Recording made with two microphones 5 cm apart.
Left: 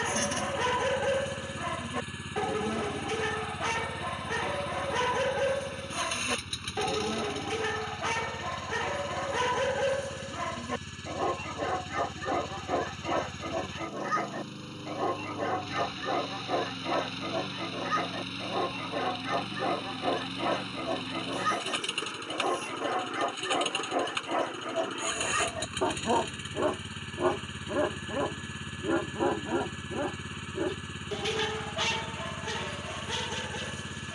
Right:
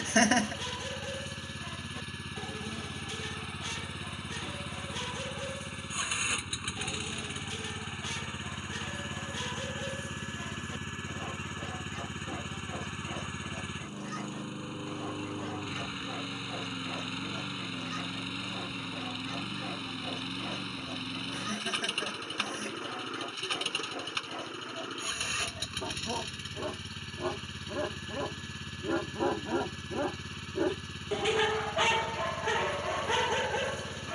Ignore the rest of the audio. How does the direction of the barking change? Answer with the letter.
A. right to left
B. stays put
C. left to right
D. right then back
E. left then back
C.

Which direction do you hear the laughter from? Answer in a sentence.
In this clip you hear the laughter on the right.